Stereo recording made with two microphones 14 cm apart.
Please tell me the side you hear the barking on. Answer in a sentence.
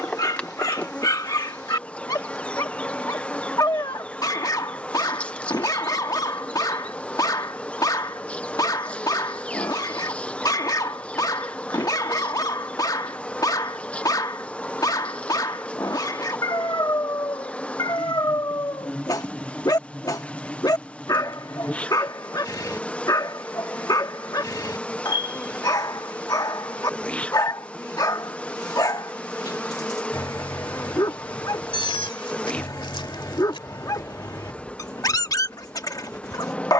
In this clip you hear the barking on the left.